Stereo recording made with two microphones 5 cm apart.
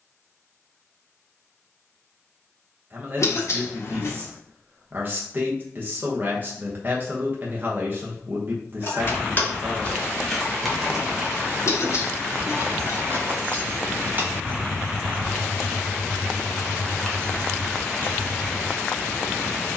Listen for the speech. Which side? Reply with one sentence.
You can hear the speech on the right.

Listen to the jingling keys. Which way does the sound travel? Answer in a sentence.
You can hear the jingling keys go right and come back.